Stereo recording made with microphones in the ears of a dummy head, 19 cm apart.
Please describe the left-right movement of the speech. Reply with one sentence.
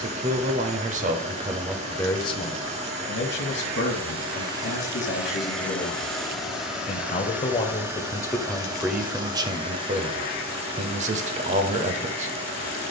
In this clip you hear the speech go left and come back.